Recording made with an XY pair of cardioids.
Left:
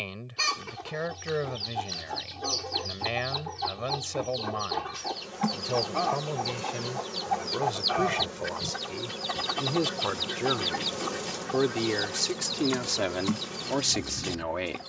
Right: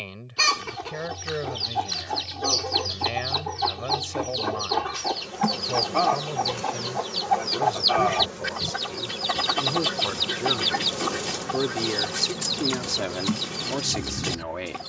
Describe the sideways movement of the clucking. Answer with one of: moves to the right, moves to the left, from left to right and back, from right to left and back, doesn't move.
doesn't move.